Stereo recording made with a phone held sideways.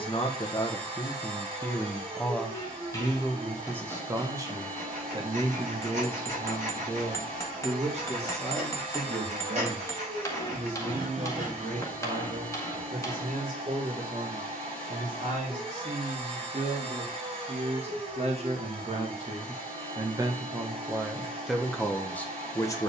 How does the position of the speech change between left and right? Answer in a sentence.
In this clip you hear the speech move from left to right and back again.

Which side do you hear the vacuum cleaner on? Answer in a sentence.
You can hear the vacuum cleaner on the right.